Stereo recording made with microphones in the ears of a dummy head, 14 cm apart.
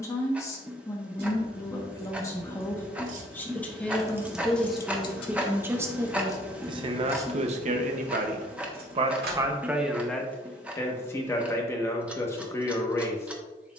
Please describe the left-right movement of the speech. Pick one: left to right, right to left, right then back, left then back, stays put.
right then back.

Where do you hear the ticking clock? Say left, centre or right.
centre.